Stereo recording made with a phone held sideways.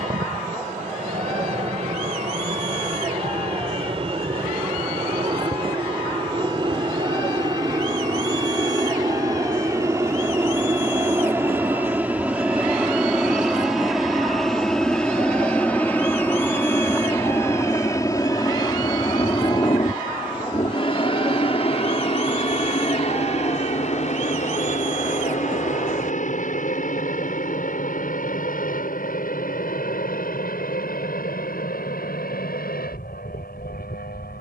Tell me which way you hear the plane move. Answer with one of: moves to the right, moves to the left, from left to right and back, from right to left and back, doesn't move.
moves to the left.